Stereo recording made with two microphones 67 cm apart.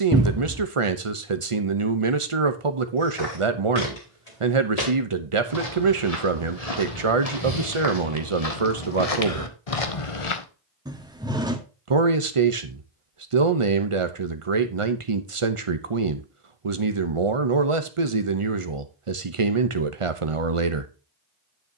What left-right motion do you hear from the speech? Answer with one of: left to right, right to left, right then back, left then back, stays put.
stays put.